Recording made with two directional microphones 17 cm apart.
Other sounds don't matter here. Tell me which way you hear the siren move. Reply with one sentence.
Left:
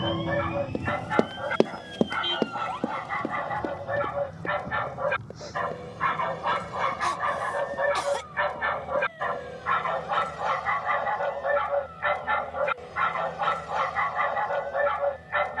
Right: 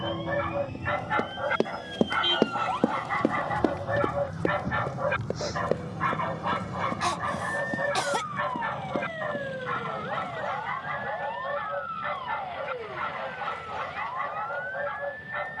You can hear the siren travel towards the right.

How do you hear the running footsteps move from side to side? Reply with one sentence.
In this clip you hear the running footsteps go from the left side to the right.